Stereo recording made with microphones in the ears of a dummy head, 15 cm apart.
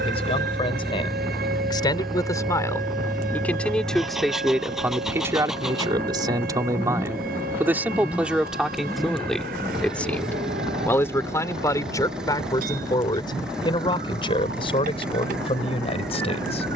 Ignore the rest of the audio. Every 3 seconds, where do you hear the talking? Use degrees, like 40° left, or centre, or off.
30° left, 10° right, 10° right, 10° left, 30° left, 40° left.